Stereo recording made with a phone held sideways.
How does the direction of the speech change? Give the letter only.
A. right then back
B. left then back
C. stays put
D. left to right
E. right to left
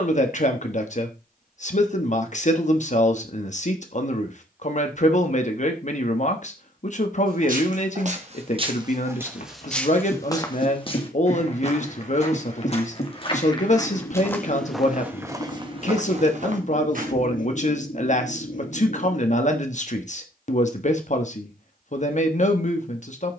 C.